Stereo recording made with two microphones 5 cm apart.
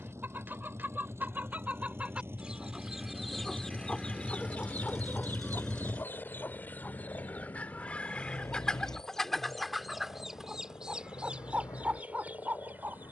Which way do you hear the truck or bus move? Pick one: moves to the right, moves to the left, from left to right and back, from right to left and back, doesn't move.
moves to the left.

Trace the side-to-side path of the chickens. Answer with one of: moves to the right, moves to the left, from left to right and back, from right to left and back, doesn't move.
from right to left and back.